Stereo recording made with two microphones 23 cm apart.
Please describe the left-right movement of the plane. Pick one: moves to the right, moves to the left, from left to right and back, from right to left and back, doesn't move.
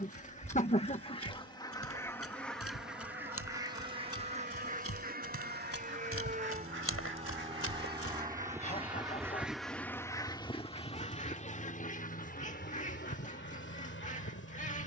moves to the left.